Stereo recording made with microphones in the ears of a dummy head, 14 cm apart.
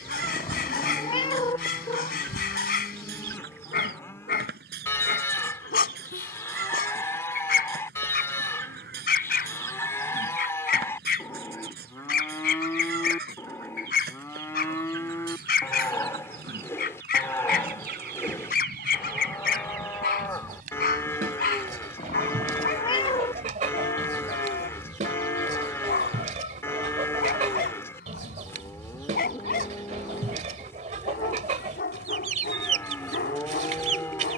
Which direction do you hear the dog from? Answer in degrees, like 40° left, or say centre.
60° left.